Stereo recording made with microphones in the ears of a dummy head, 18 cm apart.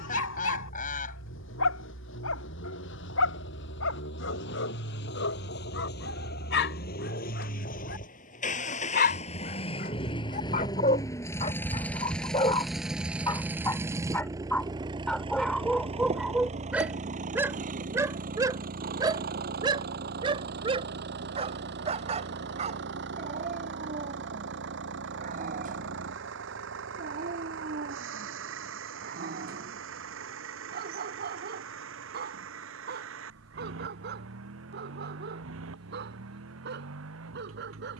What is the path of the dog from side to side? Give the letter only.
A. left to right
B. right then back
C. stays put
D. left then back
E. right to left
A.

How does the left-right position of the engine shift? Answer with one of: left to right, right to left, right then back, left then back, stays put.
left to right.